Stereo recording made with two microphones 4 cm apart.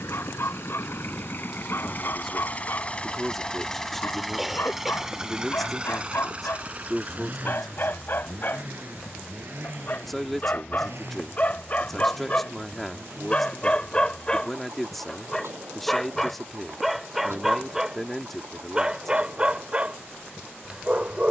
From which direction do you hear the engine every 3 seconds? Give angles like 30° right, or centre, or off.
50° left, centre, 40° right, 50° right, 60° right, 60° right, 60° right.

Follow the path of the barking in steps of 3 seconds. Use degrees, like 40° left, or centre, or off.
60° left, 60° left, 50° left, 40° left, 20° left, centre, 20° right.